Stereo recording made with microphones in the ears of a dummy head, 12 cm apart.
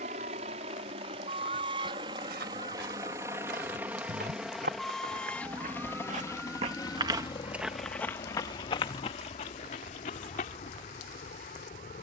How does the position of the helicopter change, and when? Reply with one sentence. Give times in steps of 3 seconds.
In this clip you hear the helicopter on the right from 0 s, in the centre from 3 s and on the left from 6 s.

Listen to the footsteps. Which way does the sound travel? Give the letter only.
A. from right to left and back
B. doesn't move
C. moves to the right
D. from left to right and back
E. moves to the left
E.